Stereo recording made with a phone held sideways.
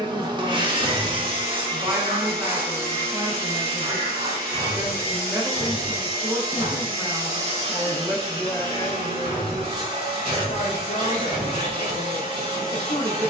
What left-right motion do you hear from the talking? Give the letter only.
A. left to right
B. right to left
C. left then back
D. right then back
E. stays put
B.